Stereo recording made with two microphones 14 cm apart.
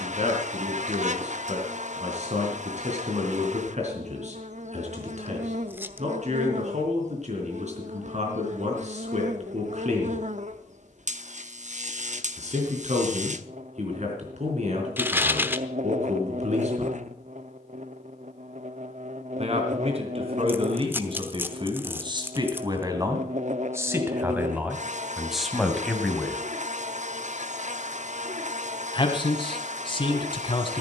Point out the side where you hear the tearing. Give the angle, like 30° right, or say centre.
10° right.